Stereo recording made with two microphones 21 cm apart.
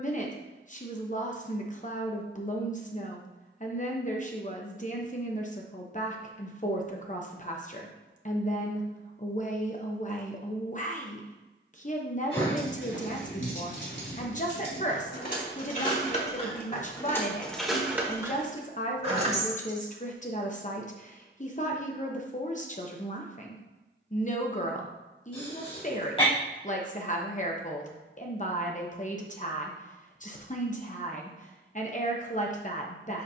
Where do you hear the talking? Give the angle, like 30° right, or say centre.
40° left.